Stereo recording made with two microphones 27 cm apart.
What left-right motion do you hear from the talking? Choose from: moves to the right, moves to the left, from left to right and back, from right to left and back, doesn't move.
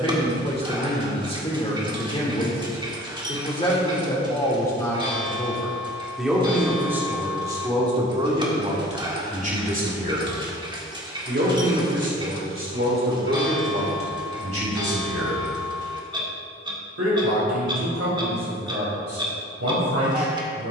moves to the right.